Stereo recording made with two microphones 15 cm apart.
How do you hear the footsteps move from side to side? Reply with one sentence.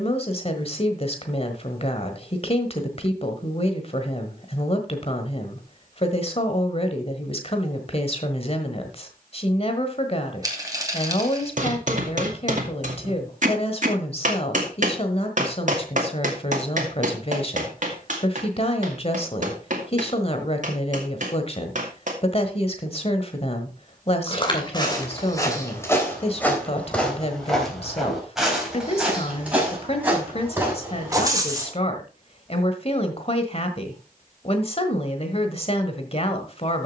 In this clip you hear the footsteps move from left to right.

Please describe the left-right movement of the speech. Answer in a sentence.
In this clip you hear the speech stay in one place.